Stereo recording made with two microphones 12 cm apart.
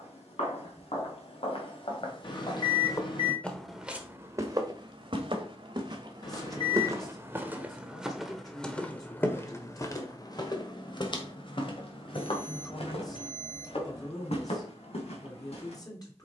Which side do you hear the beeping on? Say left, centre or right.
left.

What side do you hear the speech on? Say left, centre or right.
left.